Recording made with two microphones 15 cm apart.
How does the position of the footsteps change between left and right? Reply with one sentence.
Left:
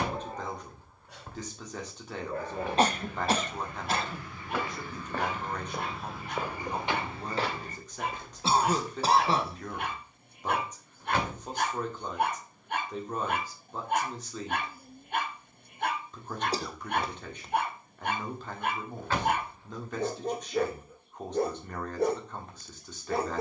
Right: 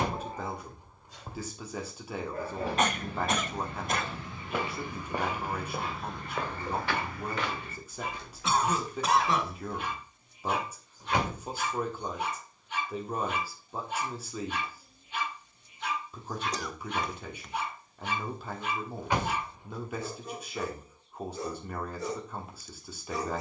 In this clip you hear the footsteps go from the right side to the left.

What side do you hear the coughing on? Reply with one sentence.
In this clip you hear the coughing on the left.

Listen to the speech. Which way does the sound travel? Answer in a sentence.
You can hear the speech stay put.